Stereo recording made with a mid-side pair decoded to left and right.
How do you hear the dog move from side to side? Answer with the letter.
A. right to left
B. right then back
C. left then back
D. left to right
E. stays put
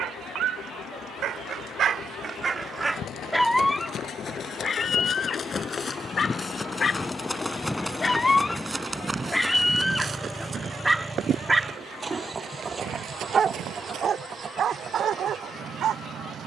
C.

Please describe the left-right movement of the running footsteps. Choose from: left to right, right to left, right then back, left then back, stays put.
left to right.